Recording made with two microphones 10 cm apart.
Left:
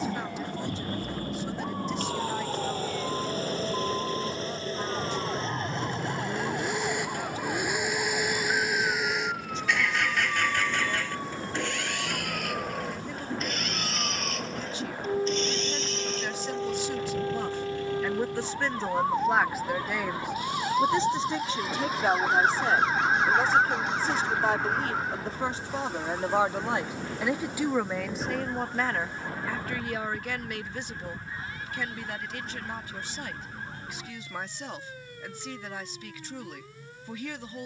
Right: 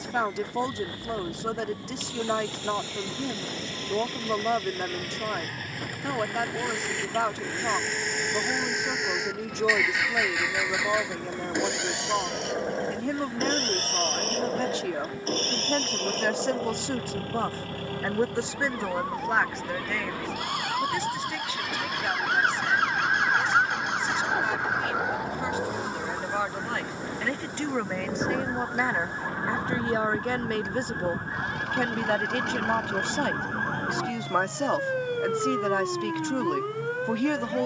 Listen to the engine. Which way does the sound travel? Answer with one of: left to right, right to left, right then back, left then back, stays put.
left to right.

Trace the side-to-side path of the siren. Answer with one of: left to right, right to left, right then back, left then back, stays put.
left to right.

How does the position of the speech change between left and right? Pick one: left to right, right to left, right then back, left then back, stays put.
left then back.